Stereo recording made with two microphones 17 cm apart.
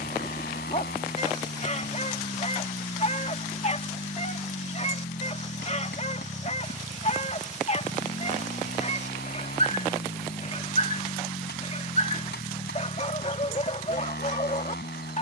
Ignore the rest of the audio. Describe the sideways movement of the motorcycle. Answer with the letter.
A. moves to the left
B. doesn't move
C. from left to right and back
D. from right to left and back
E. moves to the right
B.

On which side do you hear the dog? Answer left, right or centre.
left.